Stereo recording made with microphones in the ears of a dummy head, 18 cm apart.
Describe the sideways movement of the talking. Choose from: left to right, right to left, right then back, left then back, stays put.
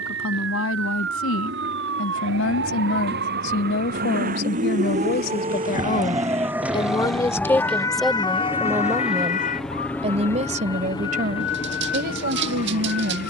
left to right.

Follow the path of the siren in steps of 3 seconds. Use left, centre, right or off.
right, right, centre, left, left.